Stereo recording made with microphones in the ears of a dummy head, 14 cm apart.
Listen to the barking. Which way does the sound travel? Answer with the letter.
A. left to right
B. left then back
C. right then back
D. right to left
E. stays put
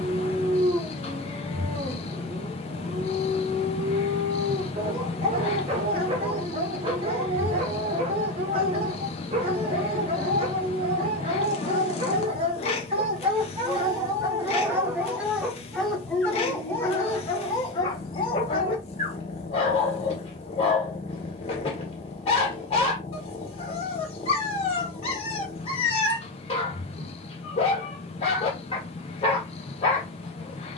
D.